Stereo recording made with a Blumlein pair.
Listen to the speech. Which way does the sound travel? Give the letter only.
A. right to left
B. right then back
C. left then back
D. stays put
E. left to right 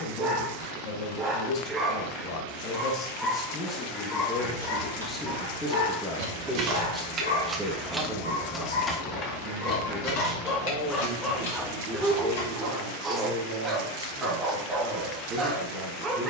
E.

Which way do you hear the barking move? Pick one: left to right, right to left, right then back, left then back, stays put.
left then back.